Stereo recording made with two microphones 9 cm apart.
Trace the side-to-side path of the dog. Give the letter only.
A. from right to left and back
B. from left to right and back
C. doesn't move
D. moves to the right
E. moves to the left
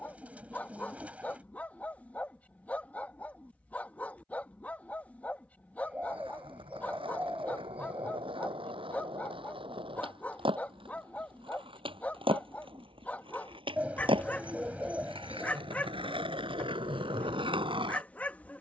C.